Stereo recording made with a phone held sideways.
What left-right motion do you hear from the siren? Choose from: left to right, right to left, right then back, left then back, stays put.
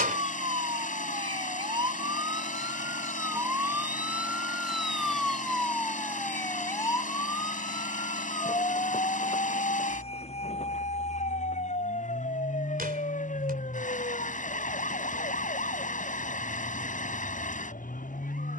right to left.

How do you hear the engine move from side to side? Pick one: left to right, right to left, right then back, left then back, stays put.
stays put.